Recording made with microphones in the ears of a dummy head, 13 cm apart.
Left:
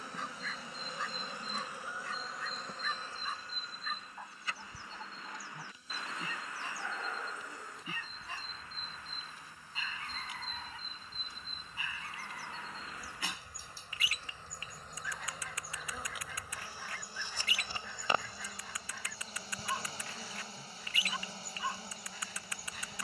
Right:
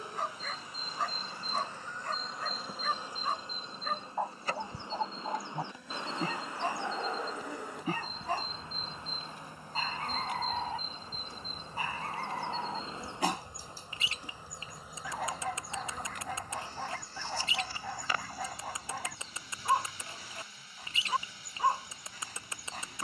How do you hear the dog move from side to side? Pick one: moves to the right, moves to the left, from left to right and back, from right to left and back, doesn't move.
doesn't move.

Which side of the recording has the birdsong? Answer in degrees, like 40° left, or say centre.
20° right.